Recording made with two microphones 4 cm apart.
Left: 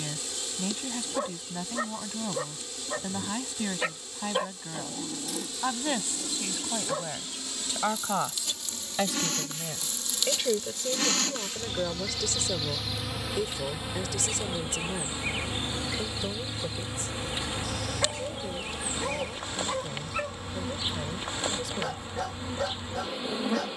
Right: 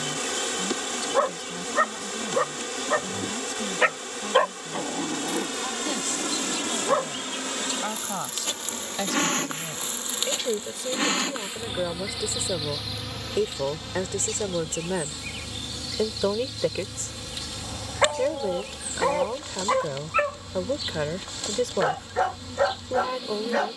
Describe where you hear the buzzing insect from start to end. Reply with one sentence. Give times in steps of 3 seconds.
You can hear the buzzing insect on the right from 0 s, in the centre from 12 s and on the left from 15 s.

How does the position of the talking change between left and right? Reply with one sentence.
In this clip you hear the talking travel towards the right.